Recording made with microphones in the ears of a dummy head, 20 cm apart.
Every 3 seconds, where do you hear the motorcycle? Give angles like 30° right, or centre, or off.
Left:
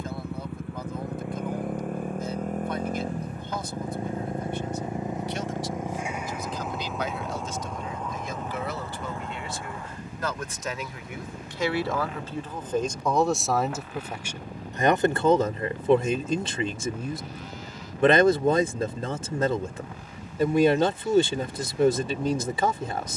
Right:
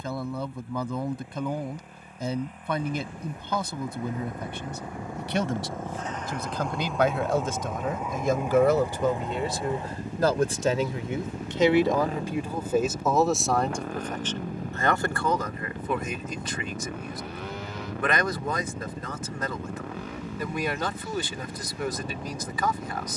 50° left, 20° left, centre, 20° right, 40° right, 50° right, 50° right, 60° right.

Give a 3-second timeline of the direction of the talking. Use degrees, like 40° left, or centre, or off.
60° right, 50° right, 40° right, 30° right, centre, 30° left, 30° left, 30° left.